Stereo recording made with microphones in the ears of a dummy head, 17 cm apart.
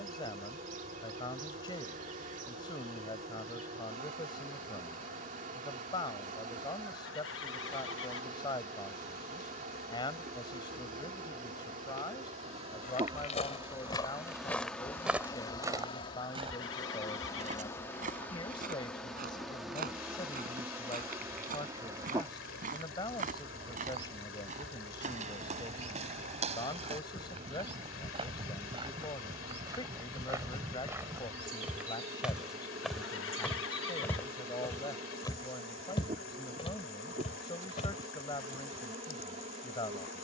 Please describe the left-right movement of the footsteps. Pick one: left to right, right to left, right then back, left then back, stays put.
right then back.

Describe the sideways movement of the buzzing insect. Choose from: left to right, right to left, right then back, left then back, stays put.
left then back.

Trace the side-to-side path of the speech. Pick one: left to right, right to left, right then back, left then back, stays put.
stays put.